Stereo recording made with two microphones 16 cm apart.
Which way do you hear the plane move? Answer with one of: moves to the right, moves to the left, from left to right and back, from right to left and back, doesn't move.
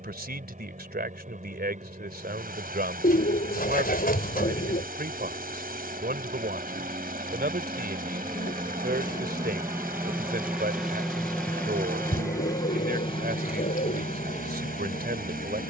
moves to the left.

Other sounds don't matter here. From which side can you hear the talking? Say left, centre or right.
right.